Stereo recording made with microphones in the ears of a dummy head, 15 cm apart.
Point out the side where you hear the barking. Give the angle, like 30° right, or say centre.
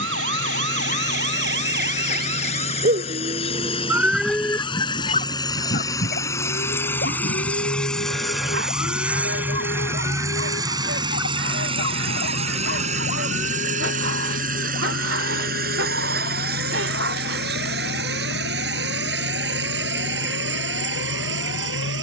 80° right.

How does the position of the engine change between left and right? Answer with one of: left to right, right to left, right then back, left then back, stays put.
left to right.